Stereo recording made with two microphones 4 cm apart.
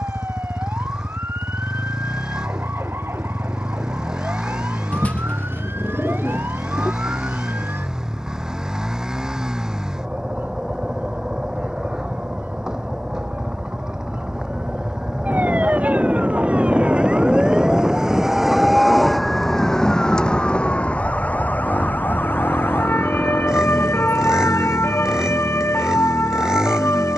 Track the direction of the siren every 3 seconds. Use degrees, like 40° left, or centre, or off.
60° right, 60° right, 60° right, 50° right, 50° right, 30° right, 10° left, 50° left, 70° left.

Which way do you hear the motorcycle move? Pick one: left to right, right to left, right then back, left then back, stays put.
stays put.